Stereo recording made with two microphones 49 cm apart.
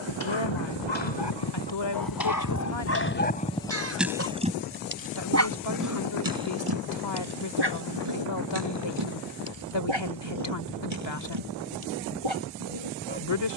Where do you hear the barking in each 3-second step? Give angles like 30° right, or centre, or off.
50° left, 10° right, 50° right, 60° right, 70° right.